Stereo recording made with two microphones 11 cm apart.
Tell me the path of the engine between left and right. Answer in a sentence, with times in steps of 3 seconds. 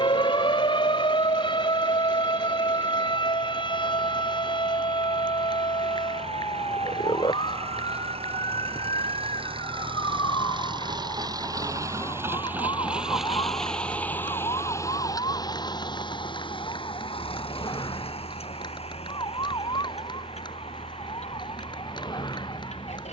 In this clip you hear the engine on the right from 0 s, in the centre from 12 s and on the left from 15 s.